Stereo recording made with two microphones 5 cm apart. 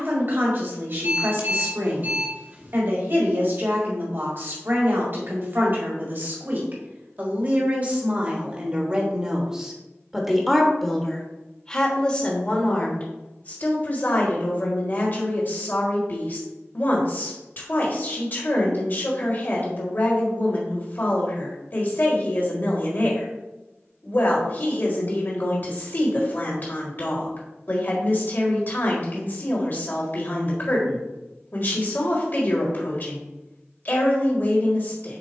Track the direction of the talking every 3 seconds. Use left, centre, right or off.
right, right, right, centre, left, left, left, left, left, left, left, left.